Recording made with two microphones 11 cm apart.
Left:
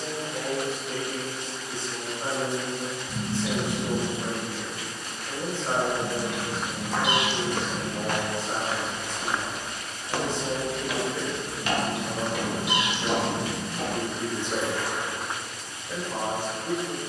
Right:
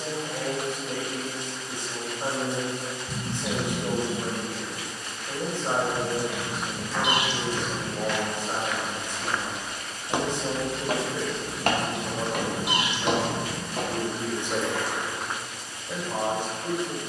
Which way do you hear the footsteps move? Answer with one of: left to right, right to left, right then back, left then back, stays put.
left to right.